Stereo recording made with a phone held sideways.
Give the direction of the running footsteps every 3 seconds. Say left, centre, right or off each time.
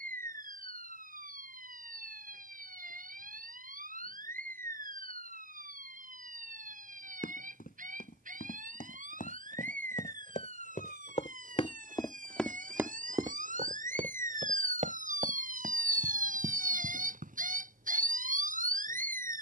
off, off, left, left, right, right, off.